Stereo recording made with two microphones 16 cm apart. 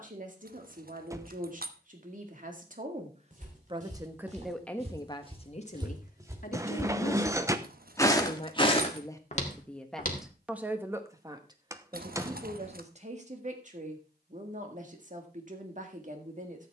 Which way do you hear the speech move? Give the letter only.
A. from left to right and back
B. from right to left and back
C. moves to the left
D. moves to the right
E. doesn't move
B.